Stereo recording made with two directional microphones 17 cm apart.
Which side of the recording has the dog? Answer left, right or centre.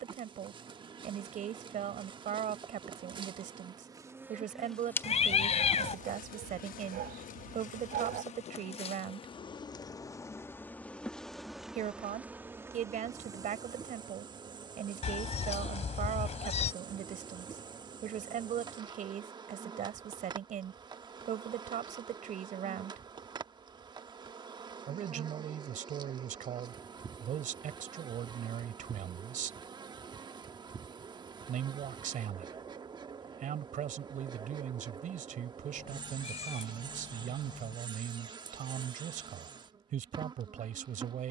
right.